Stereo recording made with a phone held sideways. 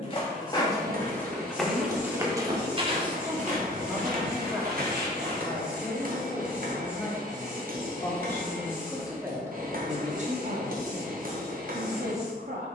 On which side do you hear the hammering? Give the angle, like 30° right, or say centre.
60° right.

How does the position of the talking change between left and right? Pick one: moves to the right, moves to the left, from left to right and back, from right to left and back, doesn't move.
from right to left and back.